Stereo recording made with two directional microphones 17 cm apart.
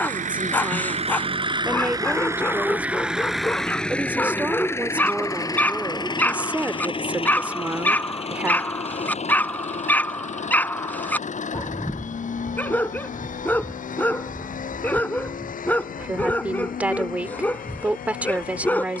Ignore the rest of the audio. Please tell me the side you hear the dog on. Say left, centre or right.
centre.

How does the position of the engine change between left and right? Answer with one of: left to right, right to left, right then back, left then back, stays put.
right to left.